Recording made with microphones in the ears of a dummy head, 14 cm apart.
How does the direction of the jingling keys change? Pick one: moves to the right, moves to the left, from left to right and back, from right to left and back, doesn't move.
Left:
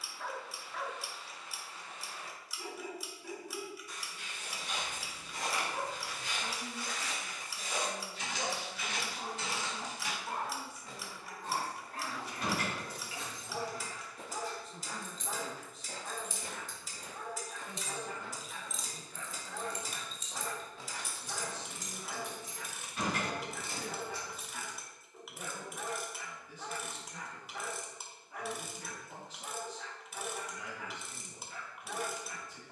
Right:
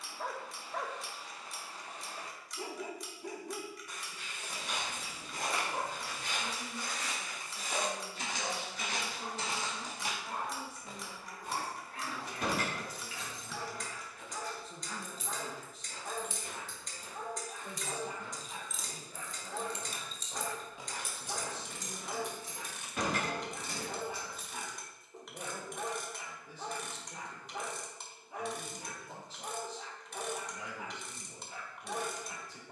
from right to left and back.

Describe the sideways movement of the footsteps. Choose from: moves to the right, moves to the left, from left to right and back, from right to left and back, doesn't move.
from right to left and back.